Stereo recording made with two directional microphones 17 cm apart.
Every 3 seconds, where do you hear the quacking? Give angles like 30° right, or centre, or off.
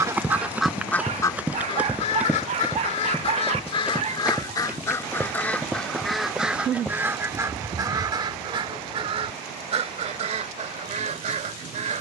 20° left, 20° left, 20° right, 40° right.